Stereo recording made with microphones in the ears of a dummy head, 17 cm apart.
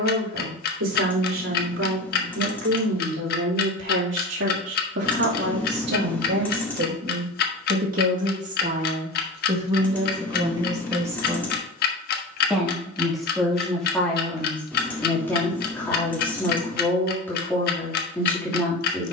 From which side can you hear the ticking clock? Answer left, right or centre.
left.